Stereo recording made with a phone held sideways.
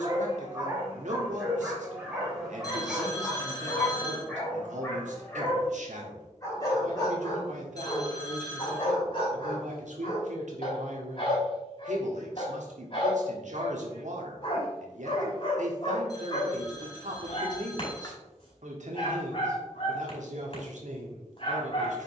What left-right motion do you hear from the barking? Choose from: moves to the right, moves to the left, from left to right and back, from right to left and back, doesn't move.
moves to the left.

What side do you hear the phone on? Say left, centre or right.
left.